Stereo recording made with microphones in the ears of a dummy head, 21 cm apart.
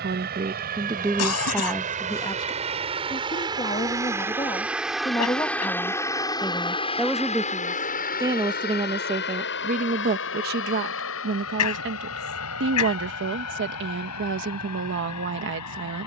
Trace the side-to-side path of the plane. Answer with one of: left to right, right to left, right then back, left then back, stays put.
right to left.